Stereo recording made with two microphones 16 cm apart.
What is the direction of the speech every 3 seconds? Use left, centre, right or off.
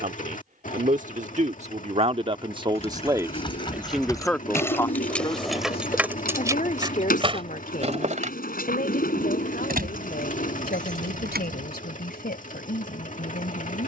right, centre, left, left, left.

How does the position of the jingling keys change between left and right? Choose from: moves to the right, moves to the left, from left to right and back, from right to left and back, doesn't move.
moves to the right.